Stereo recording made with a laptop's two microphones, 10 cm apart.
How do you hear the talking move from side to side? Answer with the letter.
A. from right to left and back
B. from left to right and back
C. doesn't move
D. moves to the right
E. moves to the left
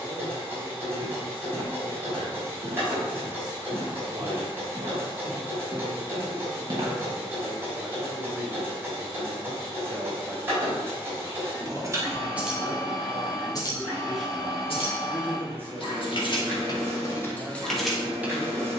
A.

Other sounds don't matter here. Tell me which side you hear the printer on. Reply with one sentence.
In this clip you hear the printer on the right.